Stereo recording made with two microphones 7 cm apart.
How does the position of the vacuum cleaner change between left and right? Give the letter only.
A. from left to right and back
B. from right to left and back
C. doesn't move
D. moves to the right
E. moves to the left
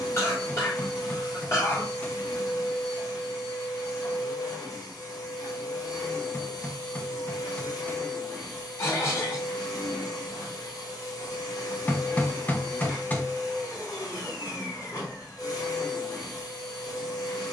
C.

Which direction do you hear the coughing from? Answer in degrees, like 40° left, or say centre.
40° left.